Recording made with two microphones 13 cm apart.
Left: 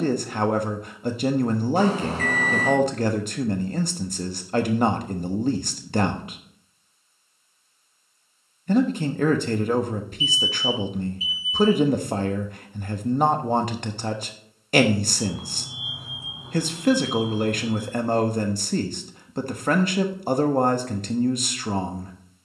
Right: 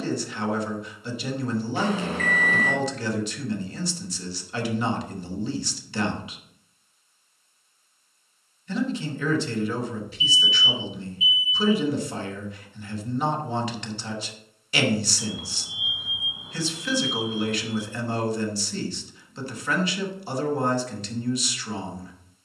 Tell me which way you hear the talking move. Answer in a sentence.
You can hear the talking stay in one place.